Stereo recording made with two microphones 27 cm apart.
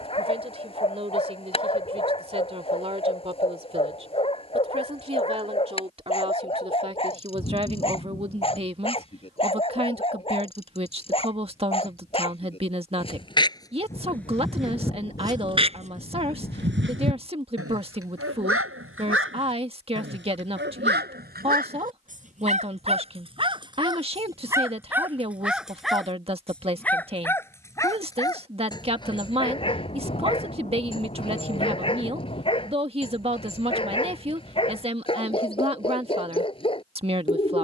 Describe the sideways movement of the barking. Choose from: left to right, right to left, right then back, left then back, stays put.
right then back.